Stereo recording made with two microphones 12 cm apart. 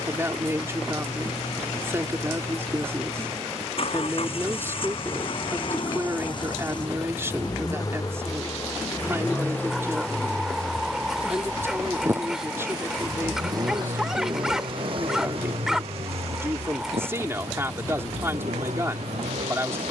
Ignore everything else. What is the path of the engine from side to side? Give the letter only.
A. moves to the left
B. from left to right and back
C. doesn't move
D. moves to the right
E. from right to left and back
D.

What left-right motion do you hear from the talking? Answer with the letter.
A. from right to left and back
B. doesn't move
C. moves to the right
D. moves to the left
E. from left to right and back
B.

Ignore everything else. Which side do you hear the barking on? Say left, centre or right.
centre.